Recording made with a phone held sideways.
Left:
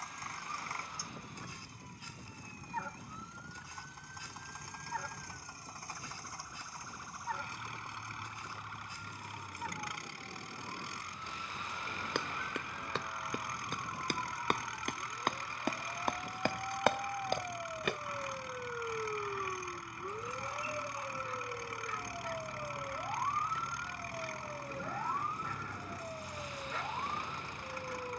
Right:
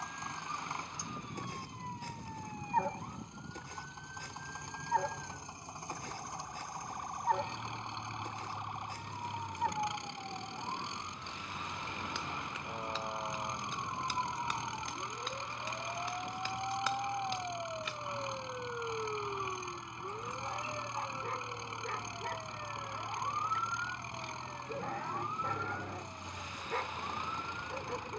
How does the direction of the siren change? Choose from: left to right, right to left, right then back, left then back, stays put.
right to left.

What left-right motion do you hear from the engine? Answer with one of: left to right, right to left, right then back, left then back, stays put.
stays put.